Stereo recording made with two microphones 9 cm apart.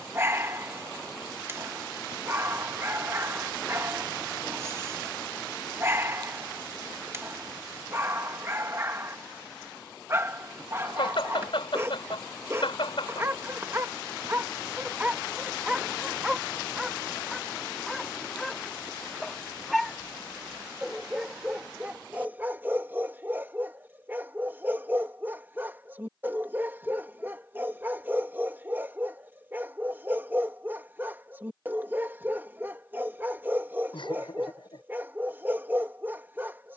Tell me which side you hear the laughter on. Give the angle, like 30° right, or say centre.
80° left.